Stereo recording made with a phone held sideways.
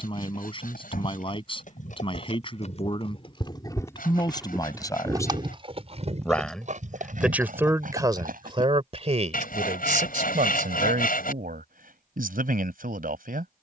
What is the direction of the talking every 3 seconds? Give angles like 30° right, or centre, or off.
40° left, 30° left, 20° right, 60° right, 70° right.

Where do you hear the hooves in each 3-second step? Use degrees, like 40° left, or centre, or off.
60° left, centre, 60° right, off, off.